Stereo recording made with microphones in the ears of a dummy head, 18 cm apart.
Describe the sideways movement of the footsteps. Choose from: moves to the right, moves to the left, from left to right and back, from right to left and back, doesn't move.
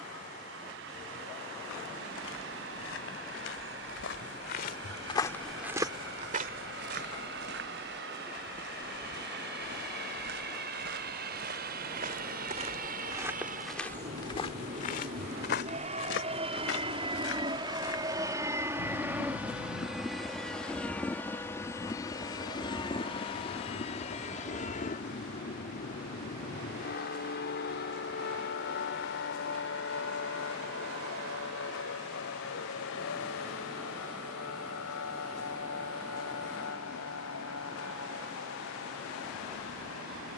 from left to right and back.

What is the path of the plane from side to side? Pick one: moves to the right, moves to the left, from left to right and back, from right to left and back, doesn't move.
moves to the left.